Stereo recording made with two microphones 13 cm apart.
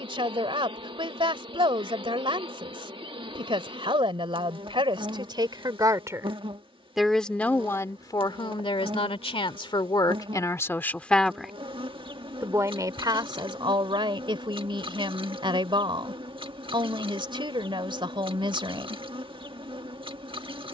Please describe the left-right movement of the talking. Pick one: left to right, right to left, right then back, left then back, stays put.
left then back.